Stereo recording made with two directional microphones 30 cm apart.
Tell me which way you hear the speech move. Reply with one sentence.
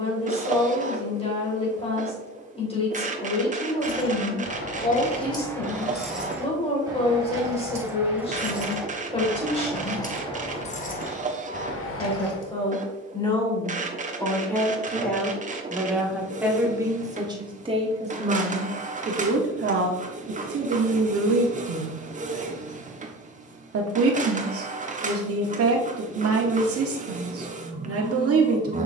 In this clip you hear the speech travel towards the right.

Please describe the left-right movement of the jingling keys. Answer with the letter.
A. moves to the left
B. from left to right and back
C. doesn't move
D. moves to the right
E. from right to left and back
B.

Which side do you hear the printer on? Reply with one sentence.
You can hear the printer on the right.